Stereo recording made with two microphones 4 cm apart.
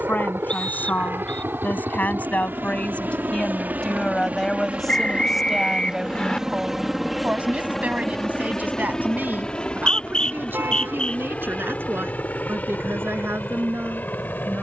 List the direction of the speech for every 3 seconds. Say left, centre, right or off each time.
left, centre, right, right, right.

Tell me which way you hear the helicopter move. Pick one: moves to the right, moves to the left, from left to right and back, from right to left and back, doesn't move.
moves to the left.